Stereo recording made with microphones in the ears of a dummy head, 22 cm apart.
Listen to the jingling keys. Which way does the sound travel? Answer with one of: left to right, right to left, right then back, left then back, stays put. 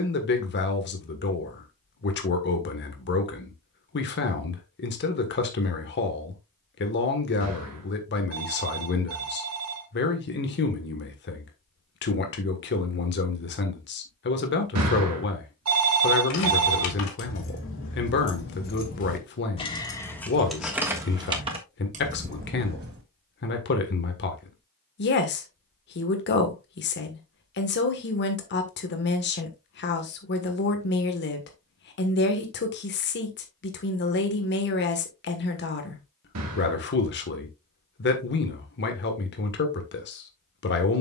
left to right.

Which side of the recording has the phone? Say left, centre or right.
right.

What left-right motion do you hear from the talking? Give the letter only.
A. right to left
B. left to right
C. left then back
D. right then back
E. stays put
E.